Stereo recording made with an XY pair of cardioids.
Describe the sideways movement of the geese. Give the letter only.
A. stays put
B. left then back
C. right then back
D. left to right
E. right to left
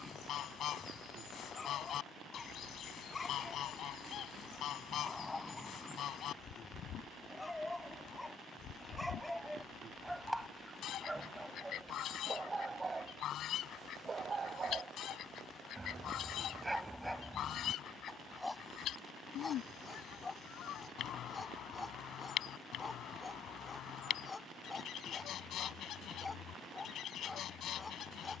A.